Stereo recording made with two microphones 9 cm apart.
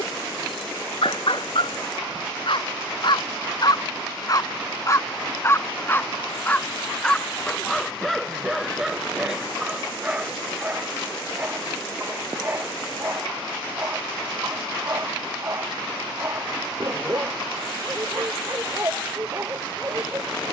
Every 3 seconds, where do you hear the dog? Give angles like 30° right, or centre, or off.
70° left, 40° left, centre, 10° right, 20° right, 30° right, 30° right.